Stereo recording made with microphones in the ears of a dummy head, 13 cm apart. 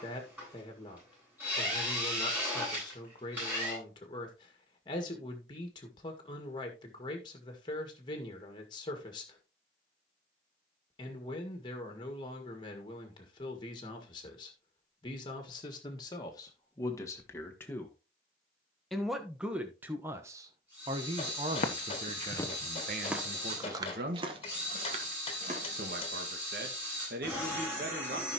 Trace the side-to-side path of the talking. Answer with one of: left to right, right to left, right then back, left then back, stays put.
left to right.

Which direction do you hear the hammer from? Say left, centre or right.
left.